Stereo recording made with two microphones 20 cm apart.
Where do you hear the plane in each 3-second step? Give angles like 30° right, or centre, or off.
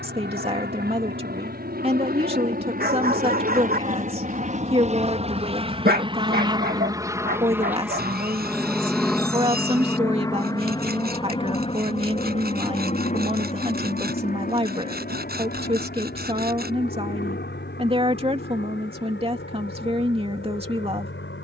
60° right, 40° right, 10° right, 20° left, 40° left, 50° left, 60° left.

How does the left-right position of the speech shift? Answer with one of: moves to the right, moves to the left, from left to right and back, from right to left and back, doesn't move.
doesn't move.